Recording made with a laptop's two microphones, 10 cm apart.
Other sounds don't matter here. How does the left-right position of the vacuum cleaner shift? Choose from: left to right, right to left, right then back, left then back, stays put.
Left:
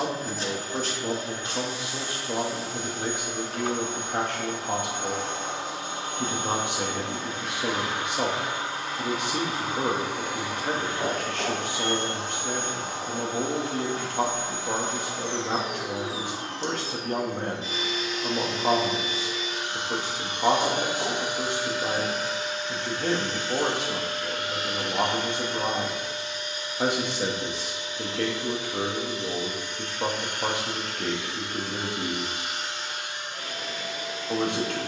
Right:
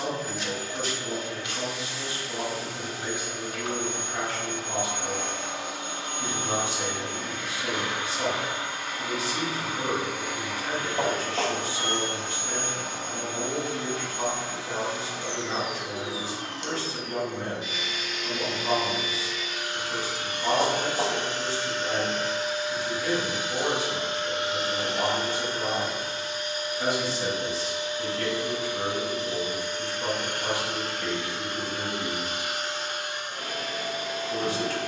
left to right.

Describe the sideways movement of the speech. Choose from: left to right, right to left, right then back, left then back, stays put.
stays put.